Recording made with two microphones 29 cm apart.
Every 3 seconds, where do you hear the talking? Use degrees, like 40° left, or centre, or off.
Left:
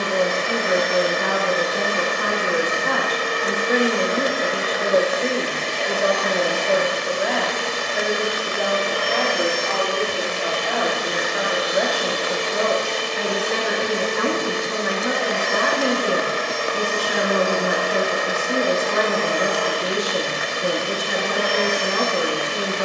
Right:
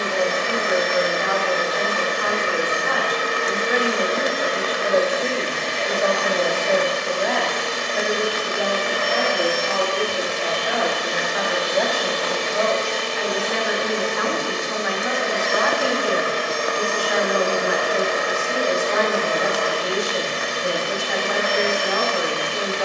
50° left, 30° left, 10° left, centre, 40° left, 40° left, 40° left, 40° left.